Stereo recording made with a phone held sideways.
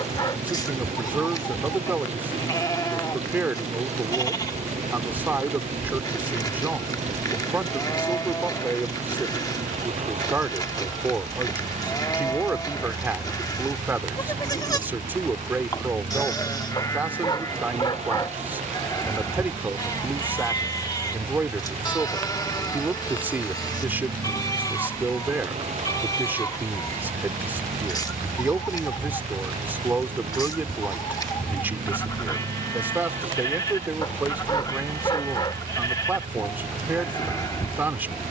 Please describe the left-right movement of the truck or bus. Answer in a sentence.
You can hear the truck or bus stay put.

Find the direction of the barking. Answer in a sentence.
You can hear the barking on the left.